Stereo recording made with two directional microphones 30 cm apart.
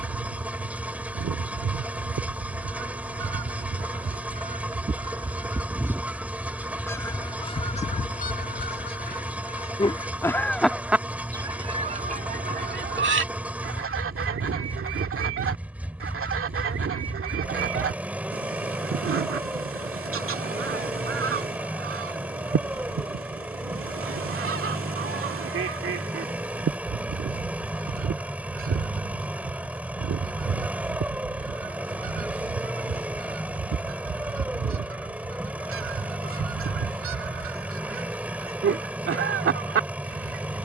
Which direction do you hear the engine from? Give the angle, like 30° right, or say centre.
centre.